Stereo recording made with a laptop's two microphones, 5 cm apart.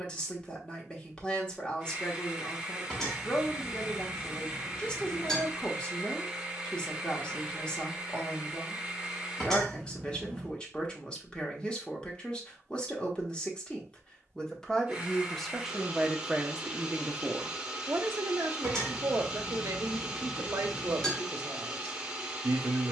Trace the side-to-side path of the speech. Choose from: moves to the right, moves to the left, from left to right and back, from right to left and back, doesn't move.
moves to the right.